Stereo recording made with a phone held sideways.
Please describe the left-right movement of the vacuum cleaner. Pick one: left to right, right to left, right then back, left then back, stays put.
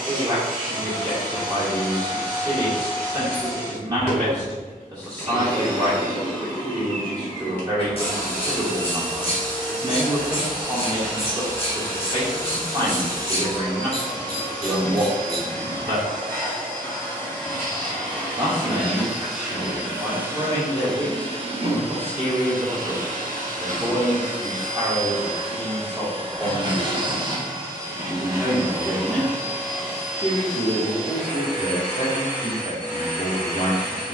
right then back.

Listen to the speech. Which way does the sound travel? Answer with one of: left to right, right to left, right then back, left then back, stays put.
right to left.